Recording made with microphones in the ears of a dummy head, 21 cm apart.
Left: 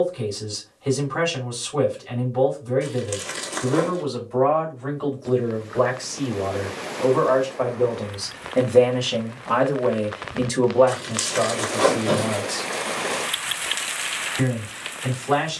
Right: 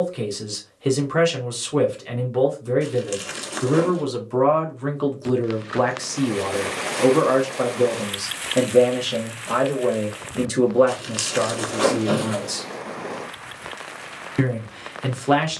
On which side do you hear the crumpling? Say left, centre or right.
centre.